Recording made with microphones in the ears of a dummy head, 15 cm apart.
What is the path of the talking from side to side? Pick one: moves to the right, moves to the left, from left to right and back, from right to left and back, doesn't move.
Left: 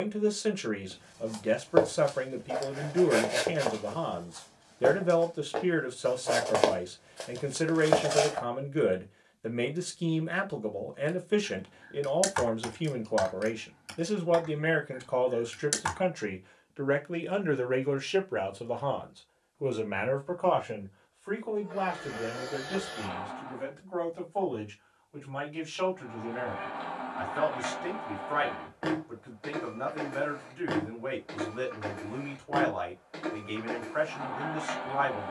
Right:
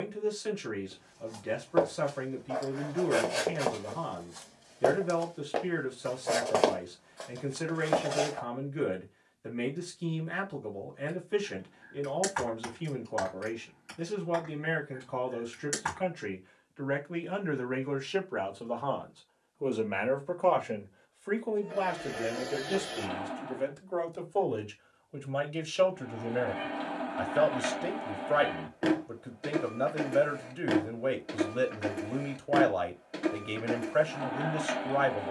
moves to the right.